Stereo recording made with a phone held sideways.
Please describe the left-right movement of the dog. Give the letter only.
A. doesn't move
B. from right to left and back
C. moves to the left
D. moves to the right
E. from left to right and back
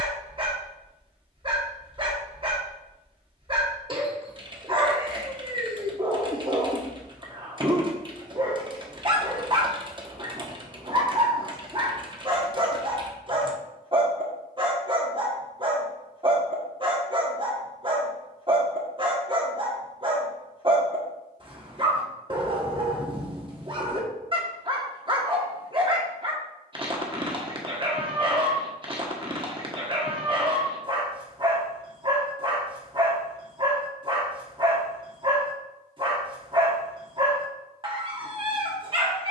A.